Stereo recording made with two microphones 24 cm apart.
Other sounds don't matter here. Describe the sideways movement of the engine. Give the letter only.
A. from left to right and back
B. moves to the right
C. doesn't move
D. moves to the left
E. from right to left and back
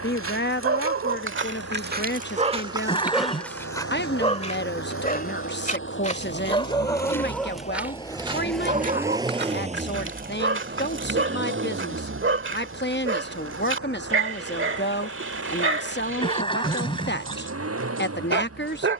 B.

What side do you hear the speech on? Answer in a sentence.
You can hear the speech on the left.